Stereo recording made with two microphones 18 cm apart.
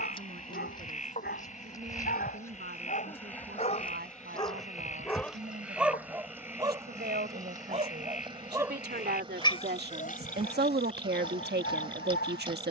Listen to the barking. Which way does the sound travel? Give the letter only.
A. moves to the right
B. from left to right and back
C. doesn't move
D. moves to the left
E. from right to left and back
B.